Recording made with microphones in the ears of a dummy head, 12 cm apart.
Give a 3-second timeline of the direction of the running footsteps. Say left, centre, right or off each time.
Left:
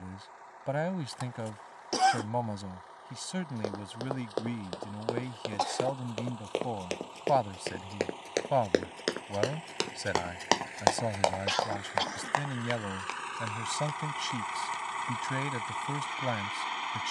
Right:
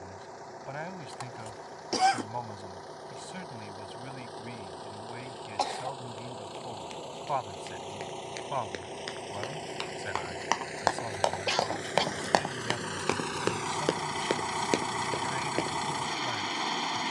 off, left, left, left, right, right.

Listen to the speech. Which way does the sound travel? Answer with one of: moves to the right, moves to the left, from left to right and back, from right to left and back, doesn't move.
doesn't move.